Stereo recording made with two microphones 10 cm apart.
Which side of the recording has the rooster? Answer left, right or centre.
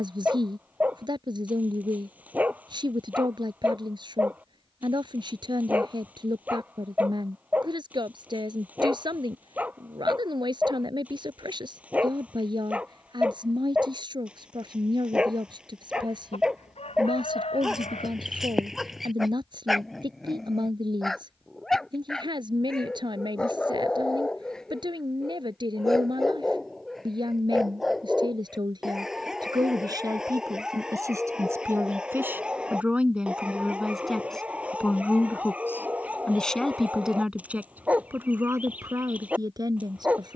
left.